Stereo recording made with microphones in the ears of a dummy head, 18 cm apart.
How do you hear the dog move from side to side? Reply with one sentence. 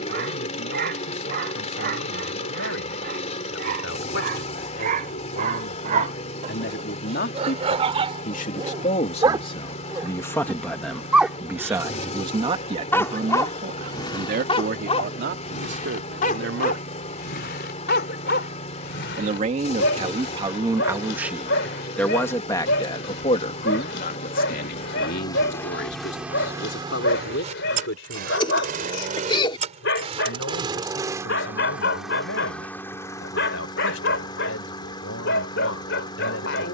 You can hear the dog move from right to left.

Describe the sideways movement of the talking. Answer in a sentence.
In this clip you hear the talking go right and come back.